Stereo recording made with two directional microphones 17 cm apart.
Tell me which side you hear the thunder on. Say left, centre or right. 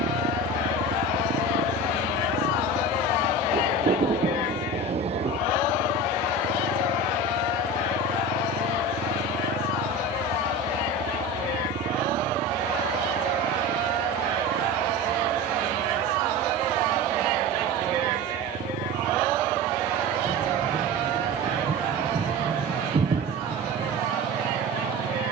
right.